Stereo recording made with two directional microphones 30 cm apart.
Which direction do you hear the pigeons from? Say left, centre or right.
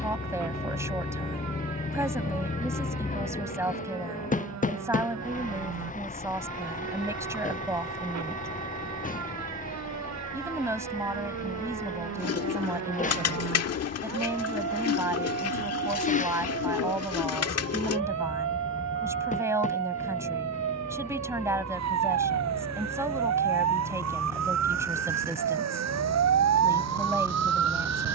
left.